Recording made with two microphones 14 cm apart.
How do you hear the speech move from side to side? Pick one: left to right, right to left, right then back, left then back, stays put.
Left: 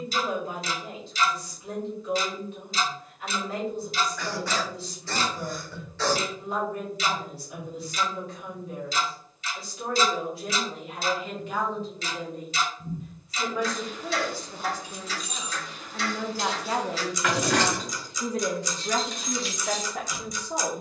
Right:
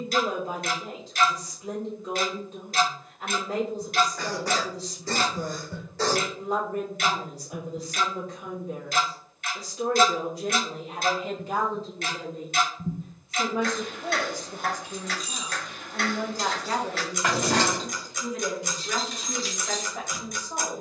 right to left.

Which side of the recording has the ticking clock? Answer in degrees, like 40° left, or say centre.
60° right.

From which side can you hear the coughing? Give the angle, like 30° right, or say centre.
40° right.